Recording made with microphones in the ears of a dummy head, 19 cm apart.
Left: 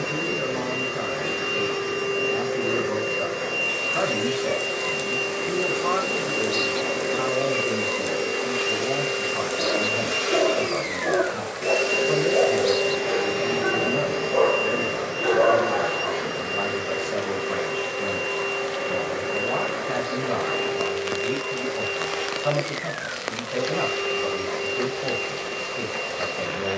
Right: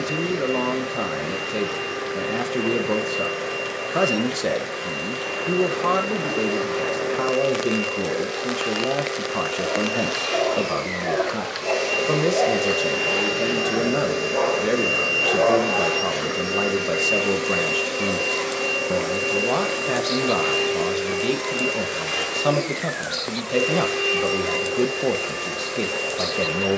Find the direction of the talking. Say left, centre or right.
right.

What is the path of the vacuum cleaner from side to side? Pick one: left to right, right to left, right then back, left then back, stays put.
left to right.